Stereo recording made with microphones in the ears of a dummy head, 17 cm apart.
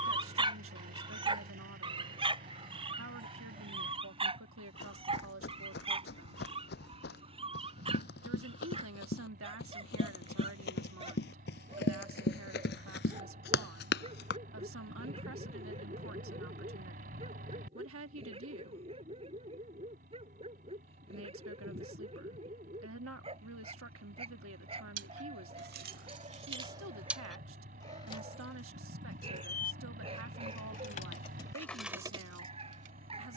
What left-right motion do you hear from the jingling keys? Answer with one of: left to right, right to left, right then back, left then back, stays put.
left then back.